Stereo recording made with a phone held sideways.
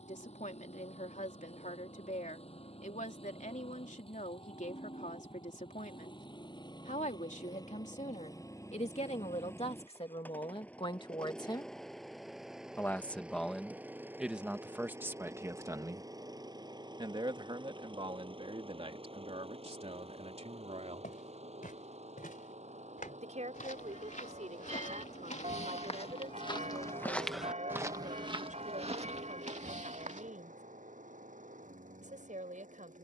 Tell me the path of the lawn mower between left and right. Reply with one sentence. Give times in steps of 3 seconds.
In this clip you hear the lawn mower on the left from 0 s, in the centre from 9 s and on the right from 15 s.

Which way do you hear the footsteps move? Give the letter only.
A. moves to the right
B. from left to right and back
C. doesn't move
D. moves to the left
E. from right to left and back
A.